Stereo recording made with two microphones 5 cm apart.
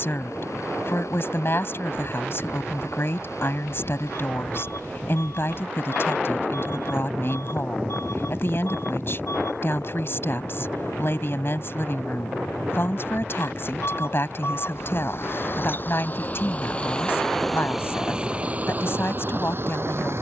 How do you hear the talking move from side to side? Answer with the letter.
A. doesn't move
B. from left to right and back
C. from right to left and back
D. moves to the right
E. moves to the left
A.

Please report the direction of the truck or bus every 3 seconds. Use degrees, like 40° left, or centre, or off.
80° left, 80° left, 70° left, 70° left, 60° left, 20° left, 40° right.